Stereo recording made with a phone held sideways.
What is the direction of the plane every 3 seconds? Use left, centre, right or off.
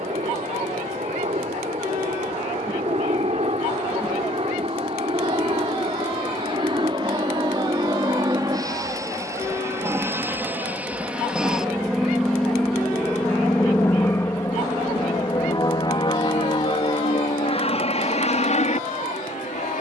right, right, right, centre, centre, left, left.